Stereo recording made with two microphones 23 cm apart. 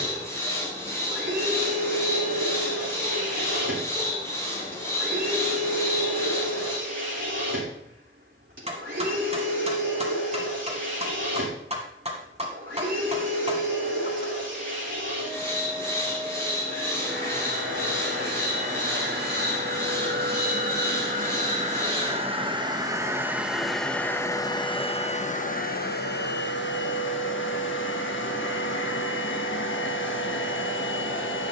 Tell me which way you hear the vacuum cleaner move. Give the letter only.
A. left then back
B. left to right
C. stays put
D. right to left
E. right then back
D.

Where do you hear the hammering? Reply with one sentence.
You can hear the hammering on the right.